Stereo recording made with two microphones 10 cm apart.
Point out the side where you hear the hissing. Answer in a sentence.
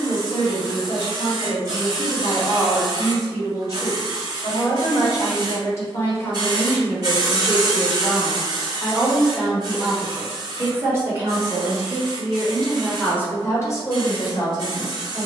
In this clip you hear the hissing on the right.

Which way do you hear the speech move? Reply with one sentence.
You can hear the speech move from left to right and back again.